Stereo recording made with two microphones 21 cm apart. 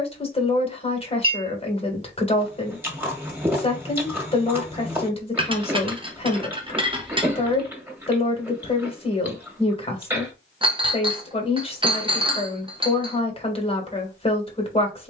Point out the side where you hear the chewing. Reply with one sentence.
In this clip you hear the chewing in the centre.